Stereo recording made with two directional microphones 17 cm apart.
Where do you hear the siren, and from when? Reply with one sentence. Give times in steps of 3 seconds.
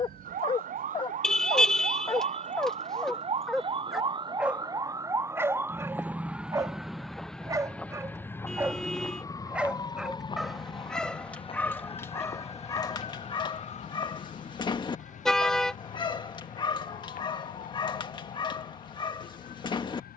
You can hear the siren on the right from 0 s, in the centre from 6 s and on the left from 9 s.